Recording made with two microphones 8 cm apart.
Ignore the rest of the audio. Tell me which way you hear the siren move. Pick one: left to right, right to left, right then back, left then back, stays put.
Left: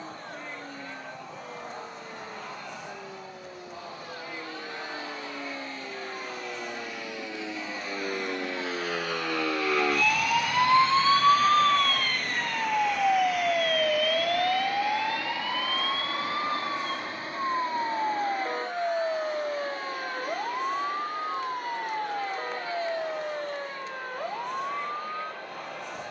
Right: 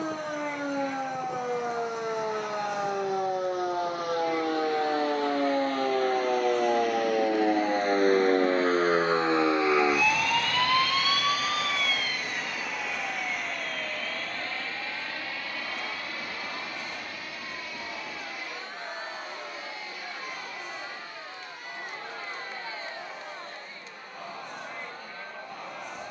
right to left.